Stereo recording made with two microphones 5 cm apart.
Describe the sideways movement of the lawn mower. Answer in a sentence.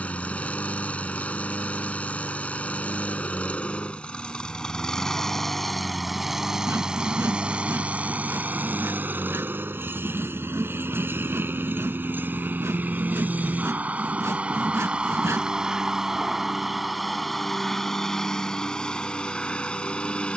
In this clip you hear the lawn mower move from left to right and back again.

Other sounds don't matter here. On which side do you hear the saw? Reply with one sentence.
In this clip you hear the saw on the right.